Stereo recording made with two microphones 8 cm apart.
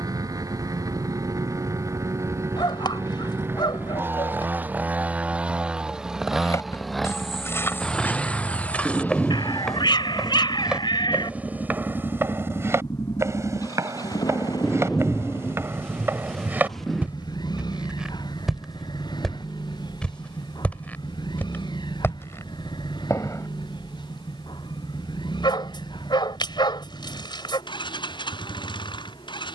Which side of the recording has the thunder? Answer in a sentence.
In this clip you hear the thunder in the centre.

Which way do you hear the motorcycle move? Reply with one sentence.
In this clip you hear the motorcycle travel towards the left.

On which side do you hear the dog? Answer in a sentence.
In this clip you hear the dog on the left.